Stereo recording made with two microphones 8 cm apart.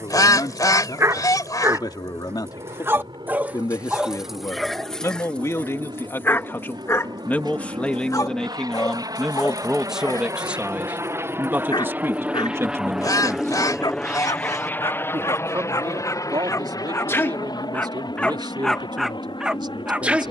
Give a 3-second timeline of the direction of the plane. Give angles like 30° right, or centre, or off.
70° right, 70° right, 60° right, 40° right, centre, 40° left, 60° left.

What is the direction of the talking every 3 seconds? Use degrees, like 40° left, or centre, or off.
50° left, 40° left, 20° left, 10° right, 30° right, 50° right, 60° right.